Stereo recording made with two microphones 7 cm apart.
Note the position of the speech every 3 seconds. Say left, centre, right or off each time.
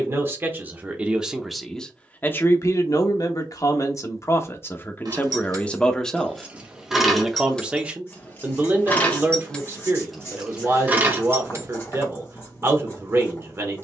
centre, left, centre, right, right.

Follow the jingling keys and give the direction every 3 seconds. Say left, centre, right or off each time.
off, right, centre, centre, off.